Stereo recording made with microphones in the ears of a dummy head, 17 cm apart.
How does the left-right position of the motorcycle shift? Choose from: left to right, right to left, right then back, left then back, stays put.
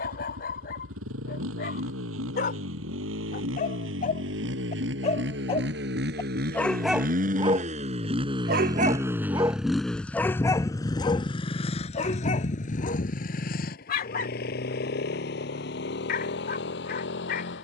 right to left.